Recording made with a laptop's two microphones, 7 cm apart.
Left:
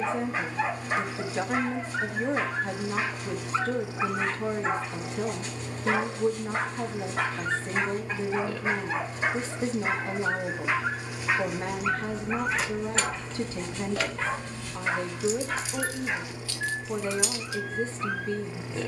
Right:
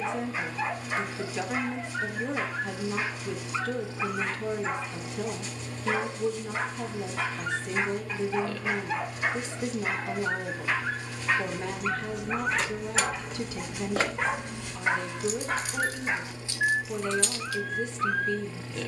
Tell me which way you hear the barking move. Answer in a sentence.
You can hear the barking move from left to right.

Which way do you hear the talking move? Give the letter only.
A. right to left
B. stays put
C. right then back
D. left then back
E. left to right
B.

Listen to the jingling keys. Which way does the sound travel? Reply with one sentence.
In this clip you hear the jingling keys move from left to right and back again.